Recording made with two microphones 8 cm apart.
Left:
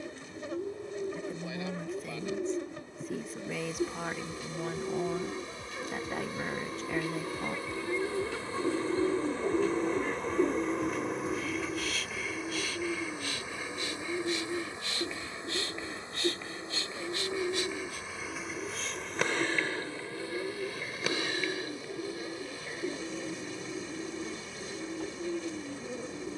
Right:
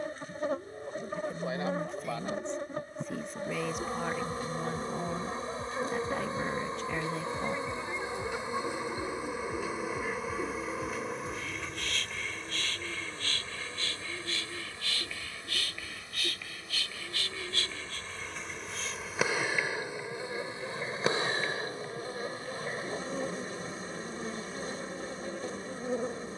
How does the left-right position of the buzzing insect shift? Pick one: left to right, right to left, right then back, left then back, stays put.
left then back.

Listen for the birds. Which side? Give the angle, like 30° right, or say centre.
70° left.